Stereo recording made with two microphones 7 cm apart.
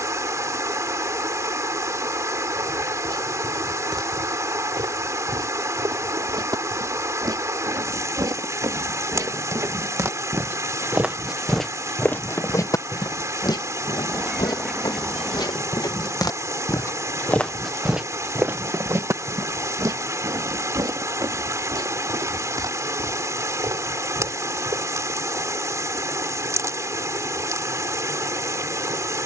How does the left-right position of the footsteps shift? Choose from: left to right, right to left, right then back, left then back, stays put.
left then back.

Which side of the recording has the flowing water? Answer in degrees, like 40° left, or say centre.
50° right.